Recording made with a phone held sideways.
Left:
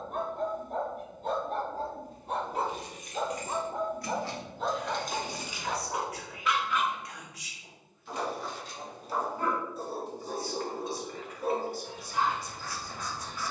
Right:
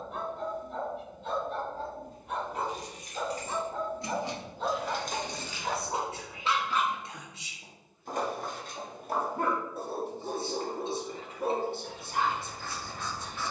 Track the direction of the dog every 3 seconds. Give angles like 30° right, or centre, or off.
40° left, centre, 40° right, 60° right, 60° right.